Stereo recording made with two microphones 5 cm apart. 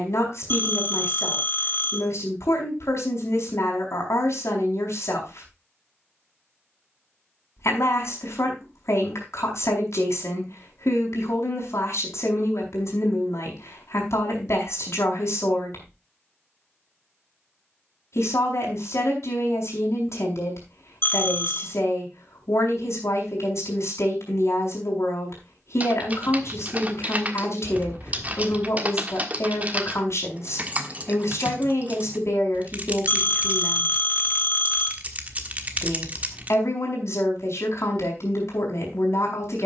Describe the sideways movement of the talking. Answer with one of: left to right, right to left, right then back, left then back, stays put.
stays put.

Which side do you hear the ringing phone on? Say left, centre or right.
left.